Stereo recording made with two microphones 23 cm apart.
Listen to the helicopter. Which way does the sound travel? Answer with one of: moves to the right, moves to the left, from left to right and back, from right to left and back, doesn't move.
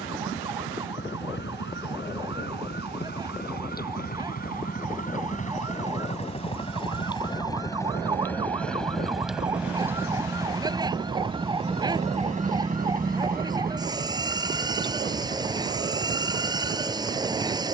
moves to the right.